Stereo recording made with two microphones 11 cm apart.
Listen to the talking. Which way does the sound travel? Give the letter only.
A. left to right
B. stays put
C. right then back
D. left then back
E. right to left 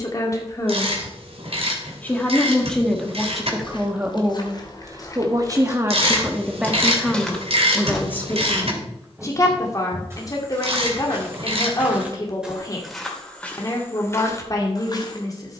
C.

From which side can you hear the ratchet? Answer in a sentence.
You can hear the ratchet on the right.